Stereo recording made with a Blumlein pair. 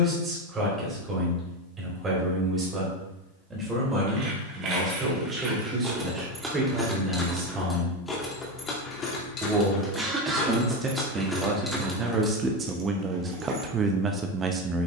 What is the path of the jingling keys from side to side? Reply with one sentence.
You can hear the jingling keys move from right to left and back again.